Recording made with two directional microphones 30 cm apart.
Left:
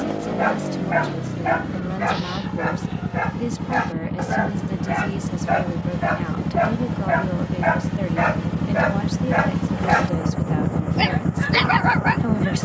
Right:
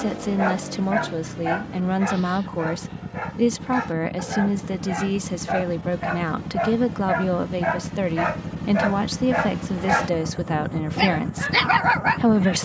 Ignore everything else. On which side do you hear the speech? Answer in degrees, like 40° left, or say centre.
40° right.